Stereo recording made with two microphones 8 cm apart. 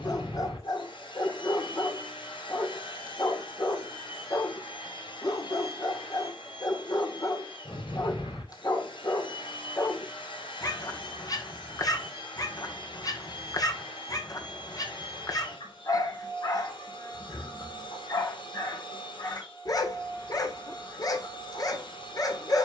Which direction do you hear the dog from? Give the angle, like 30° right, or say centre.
50° left.